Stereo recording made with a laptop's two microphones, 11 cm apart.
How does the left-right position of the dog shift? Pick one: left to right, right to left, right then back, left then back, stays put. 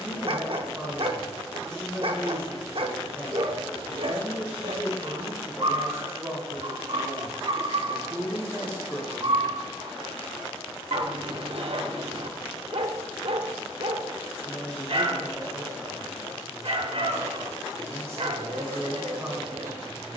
stays put.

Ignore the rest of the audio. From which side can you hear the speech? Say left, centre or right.
right.